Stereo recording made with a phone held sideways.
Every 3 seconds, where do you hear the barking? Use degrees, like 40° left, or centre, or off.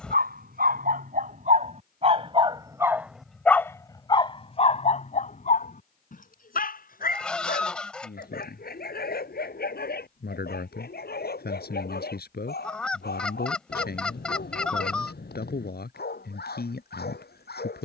50° right, 40° left, 70° left, 70° left, 80° left, 80° left.